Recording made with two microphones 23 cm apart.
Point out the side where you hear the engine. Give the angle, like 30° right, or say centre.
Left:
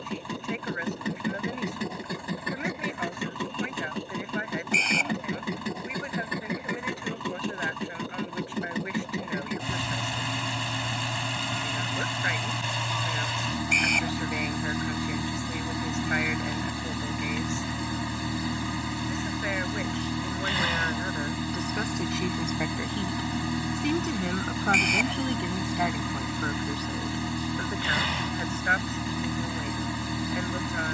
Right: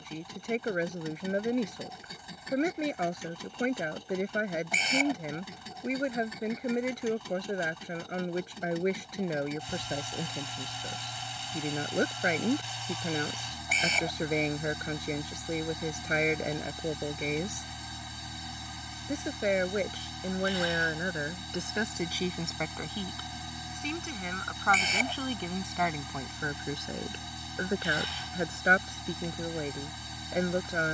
80° left.